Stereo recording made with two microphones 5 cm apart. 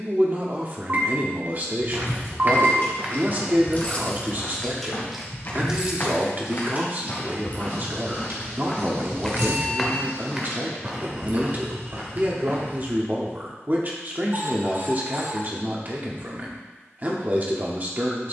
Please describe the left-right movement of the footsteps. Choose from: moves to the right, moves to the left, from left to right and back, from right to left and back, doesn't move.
from right to left and back.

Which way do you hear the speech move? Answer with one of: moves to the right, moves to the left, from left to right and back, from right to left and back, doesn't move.
doesn't move.